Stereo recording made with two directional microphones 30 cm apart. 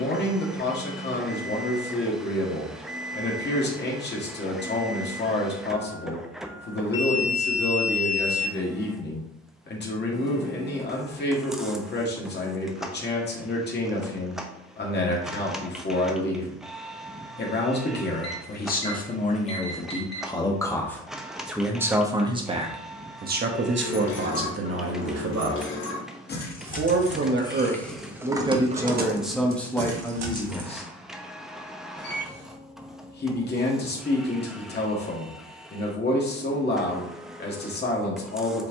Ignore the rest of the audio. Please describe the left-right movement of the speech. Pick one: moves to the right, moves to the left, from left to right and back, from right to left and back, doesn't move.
from left to right and back.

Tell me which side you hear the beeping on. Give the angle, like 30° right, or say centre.
30° left.